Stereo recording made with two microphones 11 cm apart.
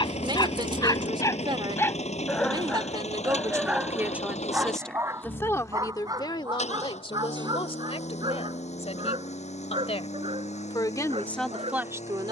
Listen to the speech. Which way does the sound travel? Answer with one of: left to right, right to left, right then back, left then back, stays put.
left then back.